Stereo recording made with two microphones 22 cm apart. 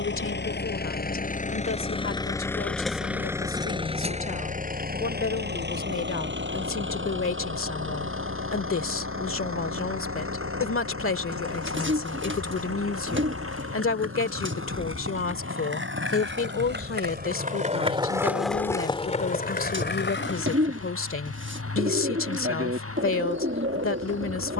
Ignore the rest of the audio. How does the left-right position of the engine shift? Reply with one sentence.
In this clip you hear the engine move to the right.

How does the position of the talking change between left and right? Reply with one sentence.
You can hear the talking stay put.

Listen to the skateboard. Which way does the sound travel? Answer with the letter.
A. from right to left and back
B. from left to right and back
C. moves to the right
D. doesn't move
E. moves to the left
E.